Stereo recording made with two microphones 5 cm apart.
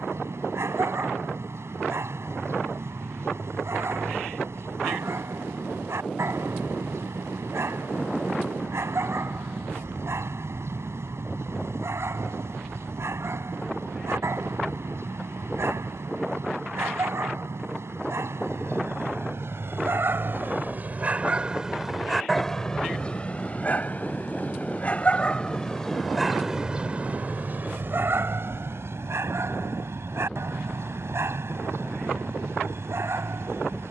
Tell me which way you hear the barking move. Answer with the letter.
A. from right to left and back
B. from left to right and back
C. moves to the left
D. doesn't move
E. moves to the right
A.